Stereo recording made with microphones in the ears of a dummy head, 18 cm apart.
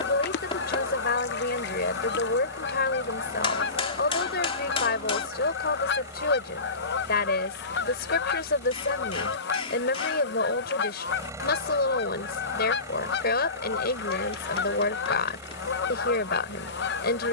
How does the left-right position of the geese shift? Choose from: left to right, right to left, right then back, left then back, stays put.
stays put.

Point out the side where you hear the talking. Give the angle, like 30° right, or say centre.
50° left.